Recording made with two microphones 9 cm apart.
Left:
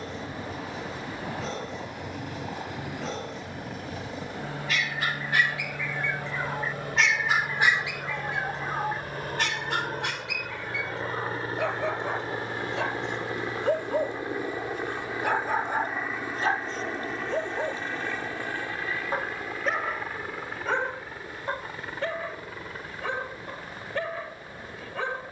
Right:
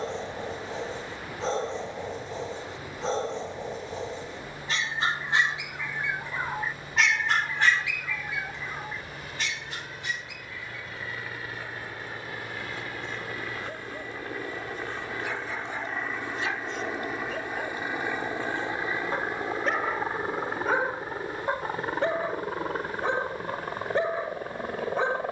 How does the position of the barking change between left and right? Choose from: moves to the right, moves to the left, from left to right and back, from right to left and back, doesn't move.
from right to left and back.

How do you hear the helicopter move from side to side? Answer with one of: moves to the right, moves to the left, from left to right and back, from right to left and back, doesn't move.
moves to the right.